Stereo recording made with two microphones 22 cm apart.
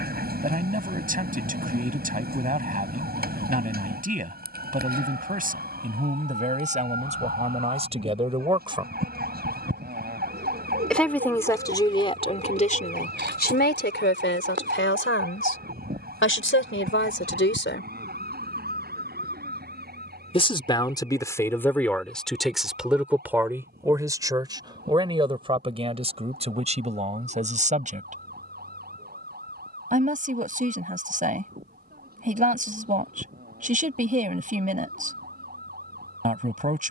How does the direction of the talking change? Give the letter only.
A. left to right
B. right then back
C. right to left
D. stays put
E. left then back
E.